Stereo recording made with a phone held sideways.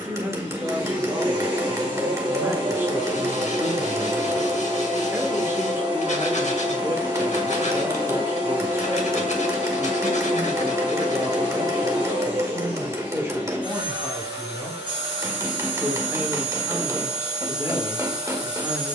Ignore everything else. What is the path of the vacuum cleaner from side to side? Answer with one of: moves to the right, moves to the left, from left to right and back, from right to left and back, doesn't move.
doesn't move.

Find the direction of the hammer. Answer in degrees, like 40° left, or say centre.
20° right.